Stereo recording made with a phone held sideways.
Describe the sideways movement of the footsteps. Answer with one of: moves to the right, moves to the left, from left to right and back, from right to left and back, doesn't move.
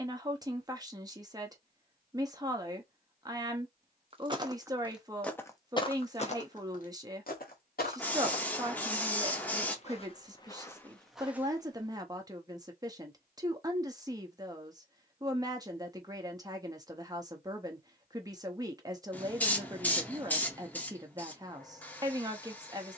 from right to left and back.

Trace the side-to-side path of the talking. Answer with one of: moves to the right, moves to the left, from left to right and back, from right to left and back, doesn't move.
doesn't move.